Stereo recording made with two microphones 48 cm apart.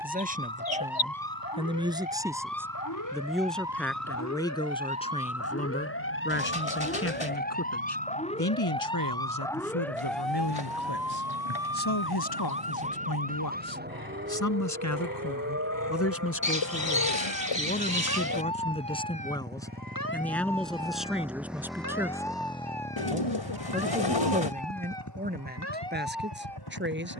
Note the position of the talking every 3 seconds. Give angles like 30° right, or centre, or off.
10° right, 10° left, 30° left, 50° left, 50° left, 30° left, 10° left, 10° right, 20° right.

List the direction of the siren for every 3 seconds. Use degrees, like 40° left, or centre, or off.
50° left, 30° left, 20° left, centre, 20° right, 30° right, 40° right, 50° right, 60° right.